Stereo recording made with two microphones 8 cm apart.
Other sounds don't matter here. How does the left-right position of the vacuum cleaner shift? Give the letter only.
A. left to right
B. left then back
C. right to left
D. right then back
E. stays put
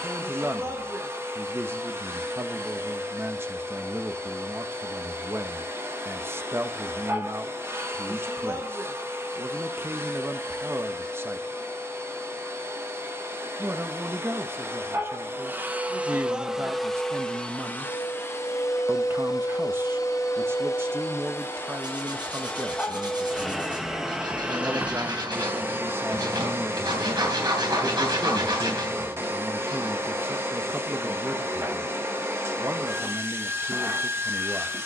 B.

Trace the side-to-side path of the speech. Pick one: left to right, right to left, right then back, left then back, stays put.
stays put.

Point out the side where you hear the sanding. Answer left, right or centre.
right.